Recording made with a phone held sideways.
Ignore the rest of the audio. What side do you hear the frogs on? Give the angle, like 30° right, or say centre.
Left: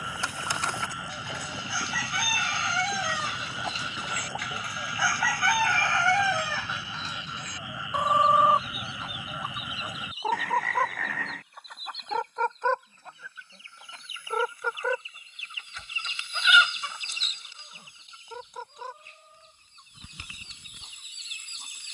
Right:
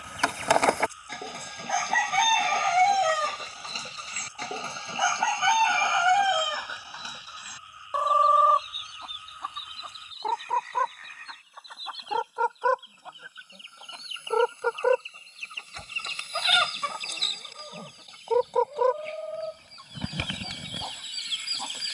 90° left.